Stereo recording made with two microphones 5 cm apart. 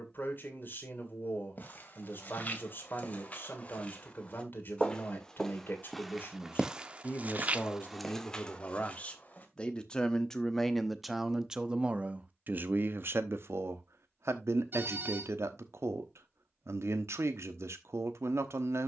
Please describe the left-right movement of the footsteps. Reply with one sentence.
In this clip you hear the footsteps move from left to right and back again.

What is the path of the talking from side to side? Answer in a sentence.
You can hear the talking travel towards the right.